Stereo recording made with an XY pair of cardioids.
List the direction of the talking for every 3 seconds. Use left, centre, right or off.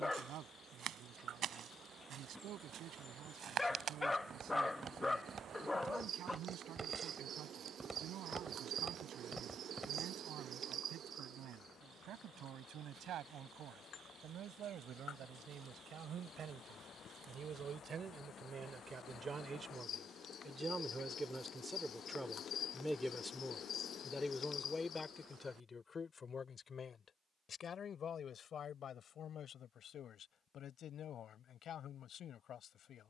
right, right, right, right, right, right, right, centre, left, left, left.